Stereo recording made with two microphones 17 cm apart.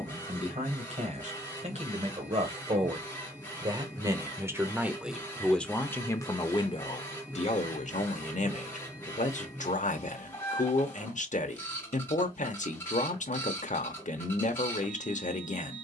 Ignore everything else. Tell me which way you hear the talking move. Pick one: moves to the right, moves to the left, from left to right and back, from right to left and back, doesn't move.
moves to the left.